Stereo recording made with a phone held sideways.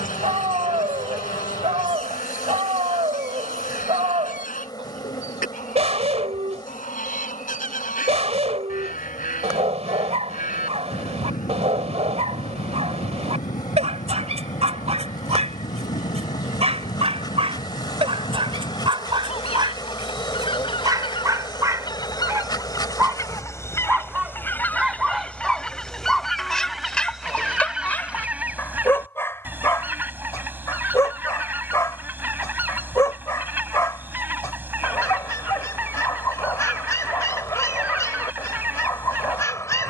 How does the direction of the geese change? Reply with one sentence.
In this clip you hear the geese move from left to right.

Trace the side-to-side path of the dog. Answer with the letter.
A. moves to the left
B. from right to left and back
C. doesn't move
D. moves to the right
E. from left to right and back
A.